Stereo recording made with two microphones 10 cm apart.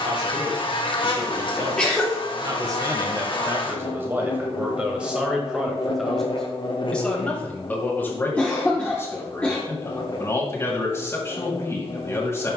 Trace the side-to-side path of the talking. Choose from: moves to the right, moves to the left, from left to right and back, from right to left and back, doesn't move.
moves to the left.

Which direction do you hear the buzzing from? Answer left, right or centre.
left.